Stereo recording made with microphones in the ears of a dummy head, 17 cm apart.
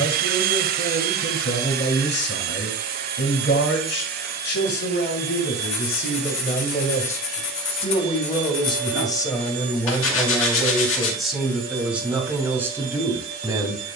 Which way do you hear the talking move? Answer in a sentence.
In this clip you hear the talking travel towards the right.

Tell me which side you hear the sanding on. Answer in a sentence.
In this clip you hear the sanding on the left.